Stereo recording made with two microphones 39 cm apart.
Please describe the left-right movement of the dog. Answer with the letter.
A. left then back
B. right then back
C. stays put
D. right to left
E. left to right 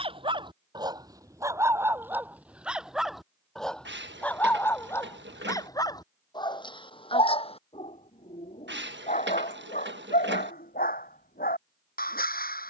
D.